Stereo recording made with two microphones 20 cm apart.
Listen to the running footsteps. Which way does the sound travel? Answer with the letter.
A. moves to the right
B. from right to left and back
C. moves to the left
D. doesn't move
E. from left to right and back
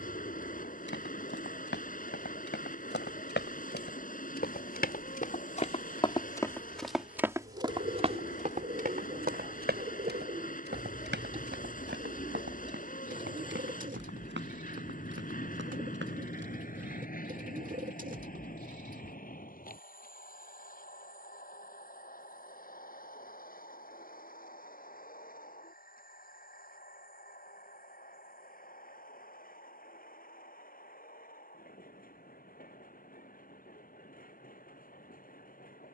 A.